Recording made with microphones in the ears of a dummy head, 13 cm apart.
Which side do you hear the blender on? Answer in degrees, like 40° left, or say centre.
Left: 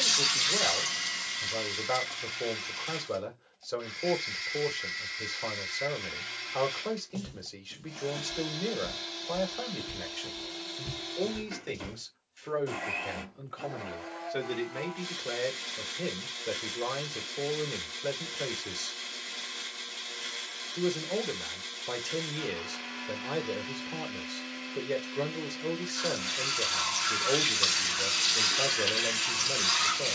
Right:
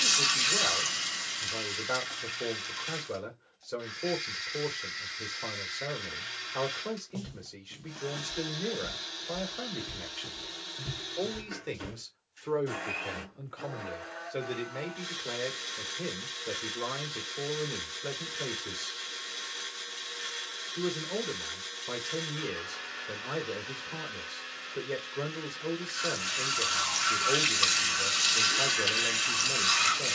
10° right.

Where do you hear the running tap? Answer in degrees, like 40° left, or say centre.
20° right.